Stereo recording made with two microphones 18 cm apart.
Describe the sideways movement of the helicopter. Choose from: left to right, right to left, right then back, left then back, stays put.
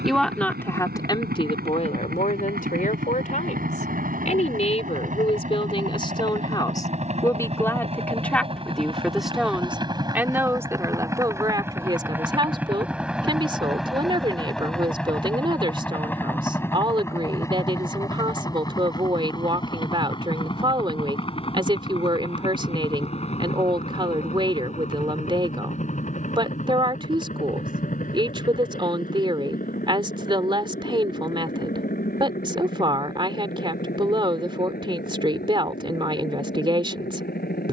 right to left.